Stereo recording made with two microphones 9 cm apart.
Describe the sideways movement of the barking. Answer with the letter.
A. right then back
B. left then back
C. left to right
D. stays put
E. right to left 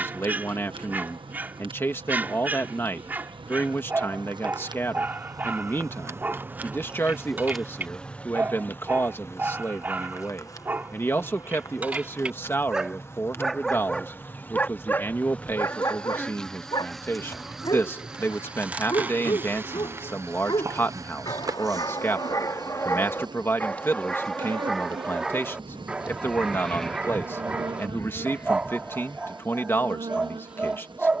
B.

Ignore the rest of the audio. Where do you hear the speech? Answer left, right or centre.
left.